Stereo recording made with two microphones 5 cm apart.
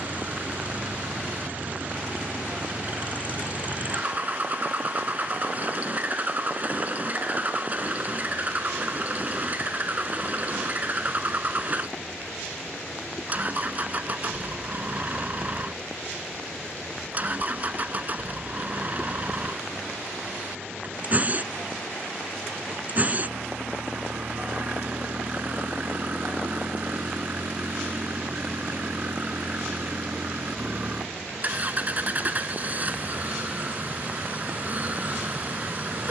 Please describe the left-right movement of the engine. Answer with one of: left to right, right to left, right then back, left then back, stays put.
stays put.